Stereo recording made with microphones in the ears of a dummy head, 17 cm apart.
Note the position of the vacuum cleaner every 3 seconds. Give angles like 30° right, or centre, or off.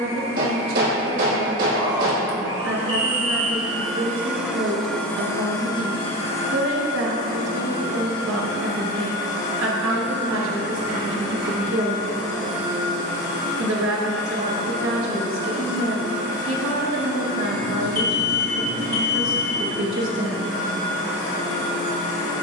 30° right, centre, 50° left, 70° left, 70° left, 70° left, 70° left, 70° left.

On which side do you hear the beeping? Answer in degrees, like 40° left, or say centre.
40° left.